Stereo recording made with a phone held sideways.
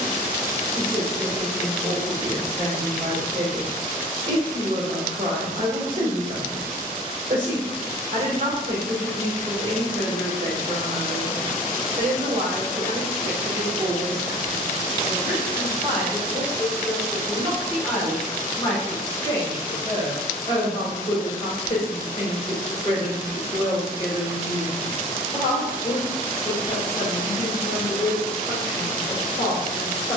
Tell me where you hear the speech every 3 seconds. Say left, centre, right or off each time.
right, right, right, right, right, centre, left, left, left, left.